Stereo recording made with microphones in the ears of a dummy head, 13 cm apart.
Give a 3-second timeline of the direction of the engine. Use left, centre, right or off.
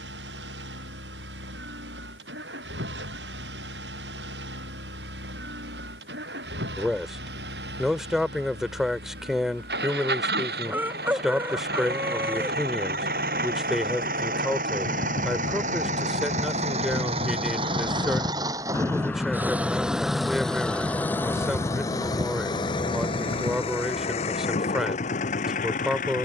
right, right, right, right, right, right, centre, left, left.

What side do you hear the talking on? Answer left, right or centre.
centre.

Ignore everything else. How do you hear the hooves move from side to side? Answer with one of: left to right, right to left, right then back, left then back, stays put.
left to right.